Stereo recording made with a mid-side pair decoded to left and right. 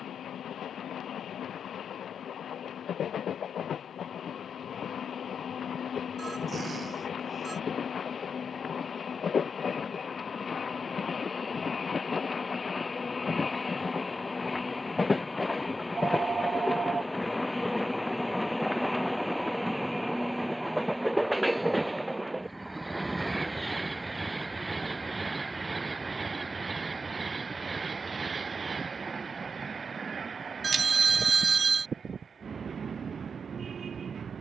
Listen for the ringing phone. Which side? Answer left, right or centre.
right.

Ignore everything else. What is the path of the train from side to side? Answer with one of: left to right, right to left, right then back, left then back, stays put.
left to right.